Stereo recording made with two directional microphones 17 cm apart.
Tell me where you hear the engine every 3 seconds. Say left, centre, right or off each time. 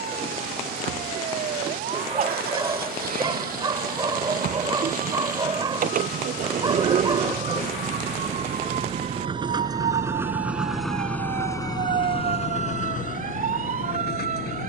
right, right, right, centre, left.